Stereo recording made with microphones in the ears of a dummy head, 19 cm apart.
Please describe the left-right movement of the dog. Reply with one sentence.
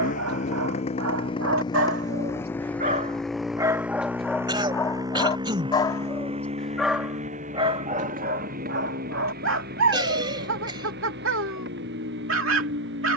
You can hear the dog go left and come back.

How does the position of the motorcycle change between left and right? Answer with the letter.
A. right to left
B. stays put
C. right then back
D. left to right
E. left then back
D.